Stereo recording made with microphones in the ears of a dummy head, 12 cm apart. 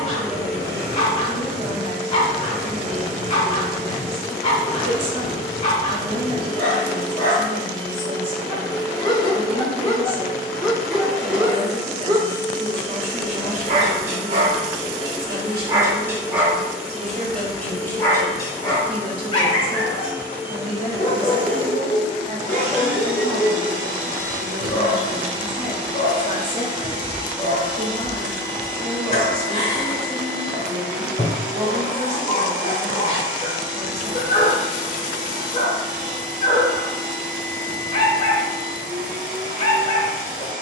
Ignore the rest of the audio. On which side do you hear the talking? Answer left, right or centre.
right.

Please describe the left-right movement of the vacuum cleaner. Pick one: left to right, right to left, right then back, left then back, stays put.
left to right.